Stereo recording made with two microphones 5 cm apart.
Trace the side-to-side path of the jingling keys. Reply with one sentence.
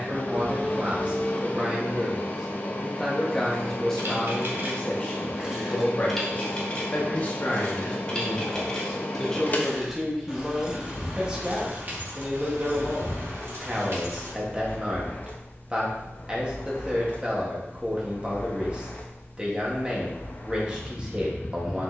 You can hear the jingling keys go left and come back.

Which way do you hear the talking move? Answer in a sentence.
In this clip you hear the talking move from right to left and back again.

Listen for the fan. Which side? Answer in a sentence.
You can hear the fan on the left.